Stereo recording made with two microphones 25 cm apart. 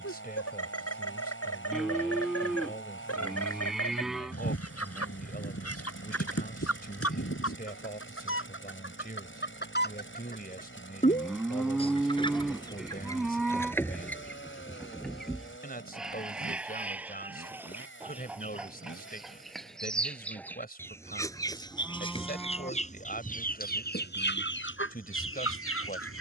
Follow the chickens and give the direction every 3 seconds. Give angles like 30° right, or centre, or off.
70° left, 70° left, 70° left, 30° left, 10° left, centre, centre, 30° left, 50° left.